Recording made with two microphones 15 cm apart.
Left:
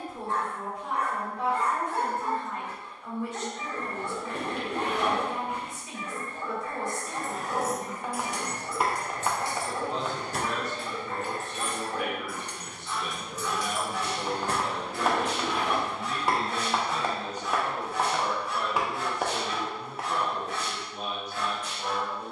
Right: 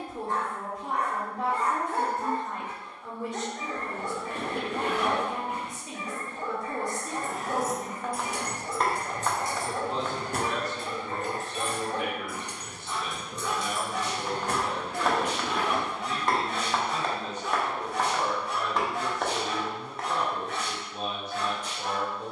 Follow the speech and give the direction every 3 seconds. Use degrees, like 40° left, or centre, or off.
40° right, 40° right, 40° right, 30° right, 10° left, 40° left, 20° right, 30° right.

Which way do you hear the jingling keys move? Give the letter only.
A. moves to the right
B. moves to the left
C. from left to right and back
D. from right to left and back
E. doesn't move
C.